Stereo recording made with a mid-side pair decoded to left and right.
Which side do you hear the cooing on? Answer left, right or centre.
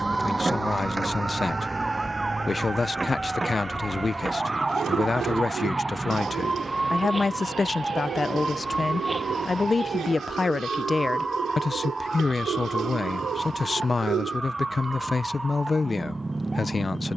right.